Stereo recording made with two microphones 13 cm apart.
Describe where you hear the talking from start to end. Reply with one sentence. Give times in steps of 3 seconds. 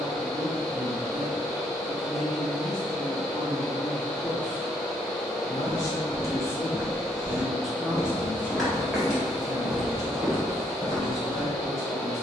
In this clip you hear the talking in the centre from 0 s, on the left from 3 s, in the centre from 6 s and on the right from 9 s.